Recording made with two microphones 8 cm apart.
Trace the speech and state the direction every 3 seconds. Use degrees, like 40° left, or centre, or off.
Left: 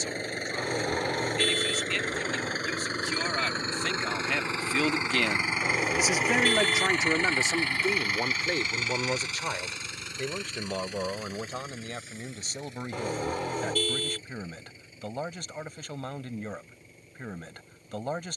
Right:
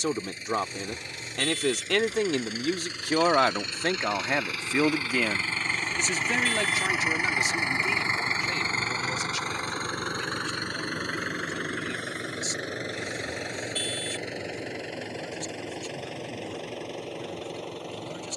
70° right, 30° right, 30° left, 50° left, 50° left, 50° left.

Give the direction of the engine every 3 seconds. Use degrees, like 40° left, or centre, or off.
50° left, 20° left, 20° right, 50° right, 70° right, 80° right.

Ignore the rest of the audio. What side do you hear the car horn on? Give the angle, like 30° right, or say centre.
60° left.